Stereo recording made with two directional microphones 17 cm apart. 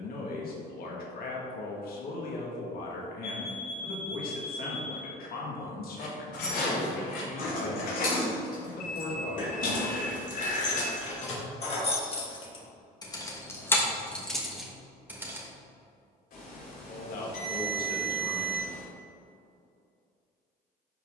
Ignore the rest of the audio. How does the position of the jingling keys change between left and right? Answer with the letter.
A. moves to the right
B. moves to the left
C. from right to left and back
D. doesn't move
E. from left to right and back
A.